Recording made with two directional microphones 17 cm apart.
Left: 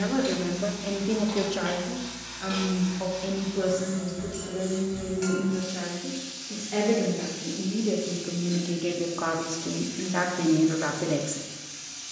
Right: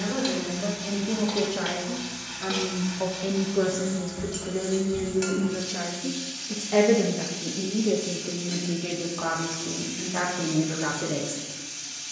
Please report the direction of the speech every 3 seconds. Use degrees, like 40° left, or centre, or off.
10° left, 30° right, 10° right, 20° left.